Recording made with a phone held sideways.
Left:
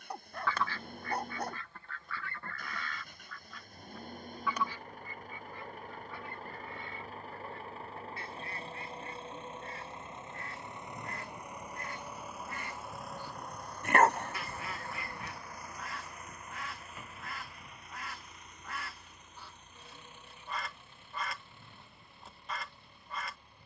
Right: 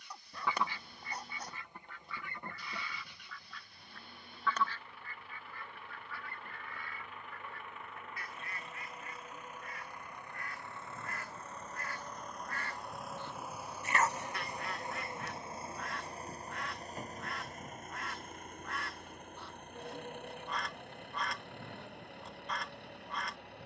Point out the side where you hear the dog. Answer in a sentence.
In this clip you hear the dog on the left.